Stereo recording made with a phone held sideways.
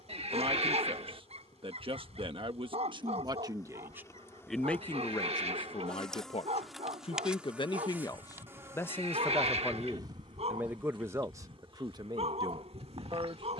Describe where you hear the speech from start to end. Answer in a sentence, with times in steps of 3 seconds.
You can hear the speech on the right from 0 s, in the centre from 3 s, on the left from 6 s, in the centre from 9 s and on the right from 12 s.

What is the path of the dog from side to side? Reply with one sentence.
In this clip you hear the dog stay put.